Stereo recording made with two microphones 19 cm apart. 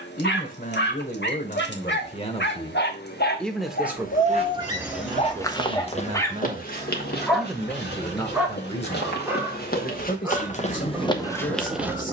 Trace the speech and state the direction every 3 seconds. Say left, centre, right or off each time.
left, right, centre, left.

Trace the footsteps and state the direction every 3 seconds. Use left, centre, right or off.
off, centre, left, left.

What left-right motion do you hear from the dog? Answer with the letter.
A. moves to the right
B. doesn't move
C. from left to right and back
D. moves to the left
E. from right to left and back
A.